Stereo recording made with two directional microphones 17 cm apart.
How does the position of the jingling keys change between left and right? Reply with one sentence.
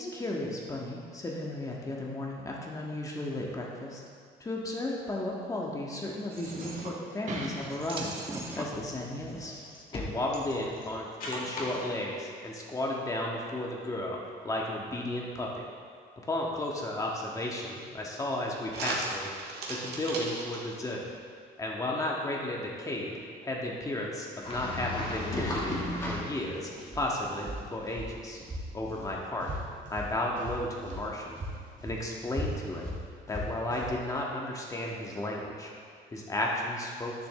In this clip you hear the jingling keys move to the left.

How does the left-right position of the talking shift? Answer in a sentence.
In this clip you hear the talking stay in one place.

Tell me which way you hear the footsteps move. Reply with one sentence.
You can hear the footsteps move from left to right and back again.